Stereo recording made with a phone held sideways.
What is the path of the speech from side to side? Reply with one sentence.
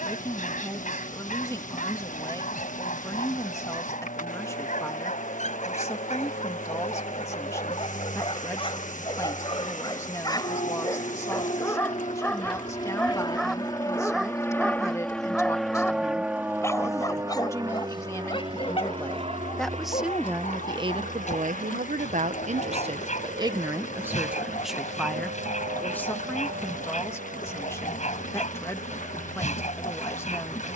You can hear the speech move from left to right and back again.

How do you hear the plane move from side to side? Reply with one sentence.
In this clip you hear the plane travel towards the right.